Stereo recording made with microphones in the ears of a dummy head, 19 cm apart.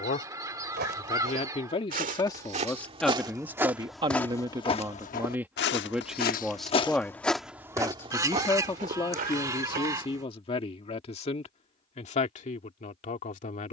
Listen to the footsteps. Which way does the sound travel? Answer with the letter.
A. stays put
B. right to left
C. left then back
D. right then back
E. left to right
C.